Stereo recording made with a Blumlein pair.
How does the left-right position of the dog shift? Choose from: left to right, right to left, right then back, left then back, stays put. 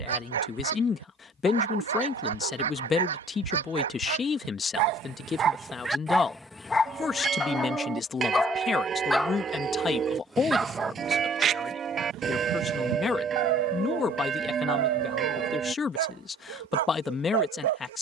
left then back.